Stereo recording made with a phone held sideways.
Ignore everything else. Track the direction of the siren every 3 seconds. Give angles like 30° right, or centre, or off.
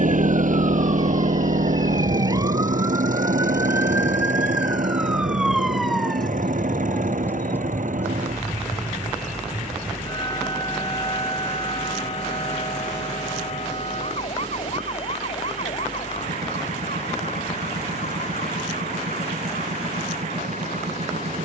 40° right, 10° right, 10° left, 30° left, 50° left, 60° left, 60° left.